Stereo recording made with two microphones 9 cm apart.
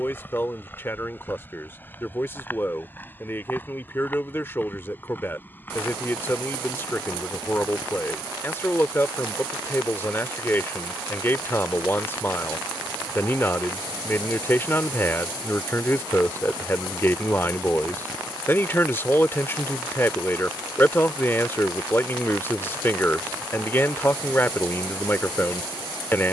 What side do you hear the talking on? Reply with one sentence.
In this clip you hear the talking on the left.